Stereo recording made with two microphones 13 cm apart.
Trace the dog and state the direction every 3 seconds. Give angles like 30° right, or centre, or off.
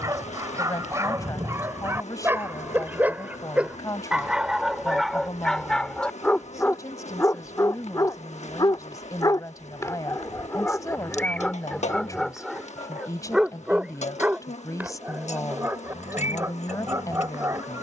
20° right, centre, 20° left, 20° left, 10° right, 20° right.